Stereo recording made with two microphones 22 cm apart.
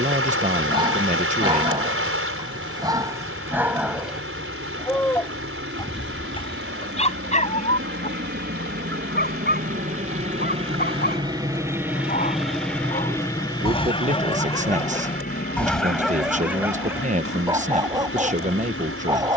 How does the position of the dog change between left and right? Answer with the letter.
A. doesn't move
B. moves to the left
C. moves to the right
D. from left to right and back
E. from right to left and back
E.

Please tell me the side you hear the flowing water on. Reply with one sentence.
In this clip you hear the flowing water on the right.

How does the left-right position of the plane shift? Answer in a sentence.
In this clip you hear the plane move to the left.